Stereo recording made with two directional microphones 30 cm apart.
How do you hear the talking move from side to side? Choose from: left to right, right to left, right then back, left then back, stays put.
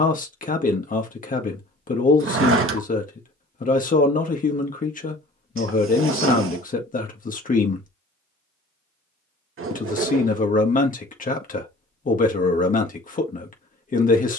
stays put.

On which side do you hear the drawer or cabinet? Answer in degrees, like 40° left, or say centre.
40° right.